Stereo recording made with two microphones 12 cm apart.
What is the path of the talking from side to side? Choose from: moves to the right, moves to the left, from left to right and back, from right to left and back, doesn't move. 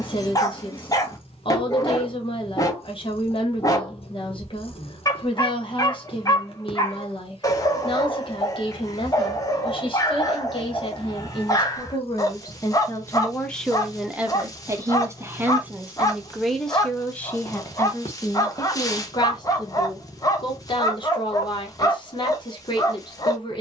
from left to right and back.